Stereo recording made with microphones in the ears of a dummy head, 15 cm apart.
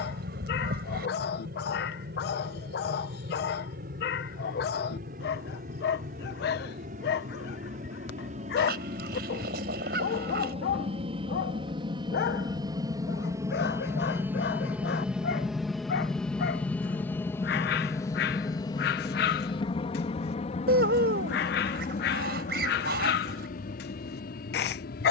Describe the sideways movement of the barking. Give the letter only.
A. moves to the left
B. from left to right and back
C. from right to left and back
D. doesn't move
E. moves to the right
D.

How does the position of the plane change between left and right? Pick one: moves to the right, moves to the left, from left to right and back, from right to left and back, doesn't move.
moves to the left.